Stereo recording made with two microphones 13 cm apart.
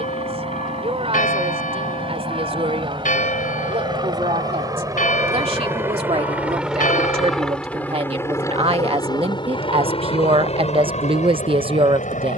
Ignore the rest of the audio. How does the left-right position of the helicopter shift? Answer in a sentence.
In this clip you hear the helicopter move to the left.